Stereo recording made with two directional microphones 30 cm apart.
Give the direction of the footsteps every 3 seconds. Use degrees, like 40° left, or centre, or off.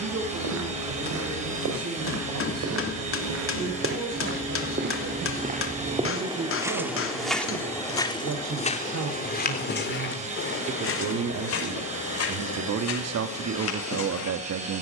60° right, 40° right, centre, 40° left, 60° left.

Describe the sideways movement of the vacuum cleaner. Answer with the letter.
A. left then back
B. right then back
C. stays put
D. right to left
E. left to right
C.